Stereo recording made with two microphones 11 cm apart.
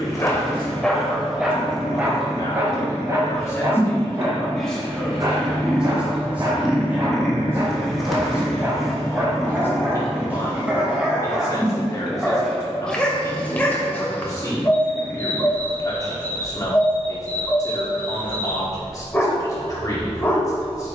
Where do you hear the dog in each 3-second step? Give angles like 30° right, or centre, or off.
centre, 30° right, 30° right, 10° right, 10° left, 20° left, 20° left.